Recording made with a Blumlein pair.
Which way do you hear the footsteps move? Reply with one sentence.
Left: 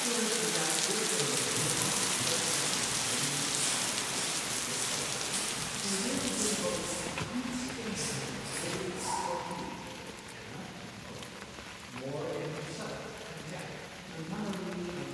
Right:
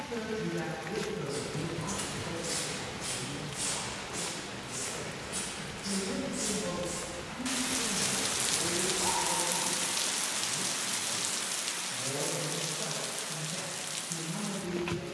You can hear the footsteps move from right to left and back again.